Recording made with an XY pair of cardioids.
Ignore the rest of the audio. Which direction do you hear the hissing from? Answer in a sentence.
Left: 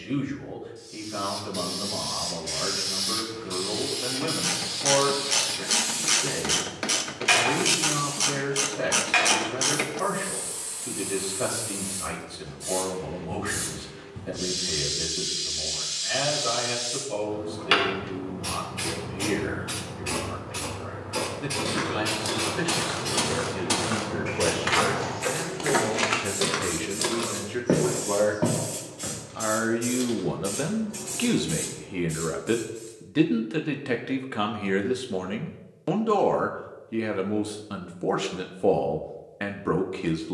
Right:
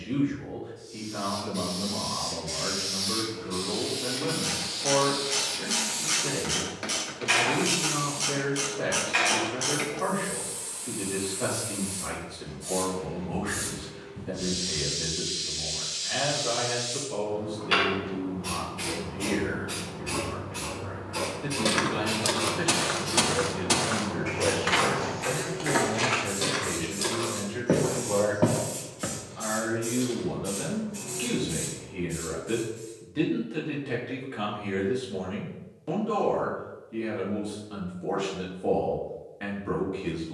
In this clip you hear the hissing on the left.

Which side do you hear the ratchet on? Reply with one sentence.
In this clip you hear the ratchet on the left.